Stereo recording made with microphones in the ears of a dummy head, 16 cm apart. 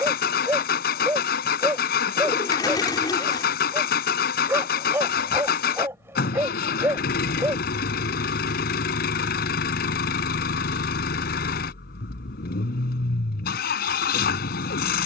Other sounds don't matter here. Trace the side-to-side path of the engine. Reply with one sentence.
You can hear the engine stay put.